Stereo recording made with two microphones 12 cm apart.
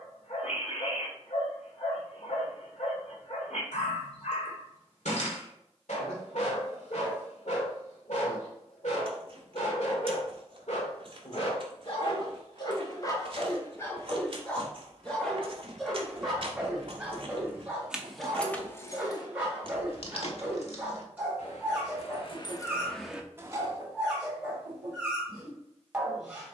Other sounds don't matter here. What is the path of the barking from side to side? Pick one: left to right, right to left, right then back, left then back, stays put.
left to right.